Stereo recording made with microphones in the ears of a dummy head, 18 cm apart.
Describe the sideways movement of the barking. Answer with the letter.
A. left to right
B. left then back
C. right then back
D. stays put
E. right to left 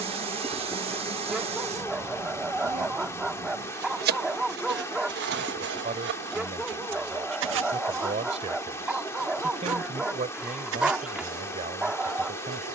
D.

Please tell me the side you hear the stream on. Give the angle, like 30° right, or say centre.
10° left.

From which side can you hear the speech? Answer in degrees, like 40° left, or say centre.
30° right.